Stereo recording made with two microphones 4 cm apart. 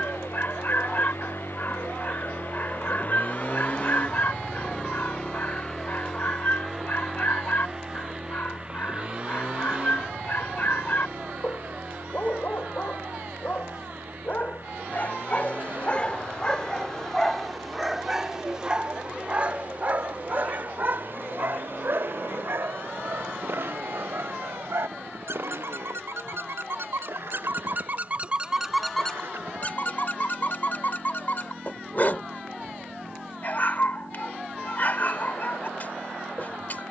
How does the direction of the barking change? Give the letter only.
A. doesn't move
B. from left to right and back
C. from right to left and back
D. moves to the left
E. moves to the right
B.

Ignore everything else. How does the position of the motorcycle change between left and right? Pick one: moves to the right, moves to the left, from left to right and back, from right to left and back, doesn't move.
moves to the right.